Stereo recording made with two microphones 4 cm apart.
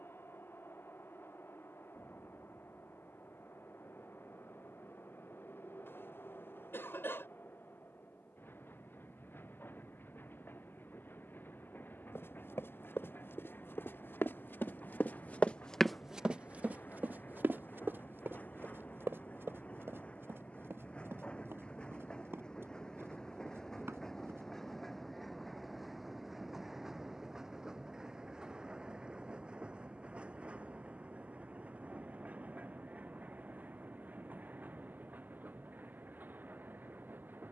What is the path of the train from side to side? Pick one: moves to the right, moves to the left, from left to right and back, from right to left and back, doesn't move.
moves to the right.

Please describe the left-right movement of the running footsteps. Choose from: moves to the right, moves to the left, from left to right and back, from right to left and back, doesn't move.
moves to the right.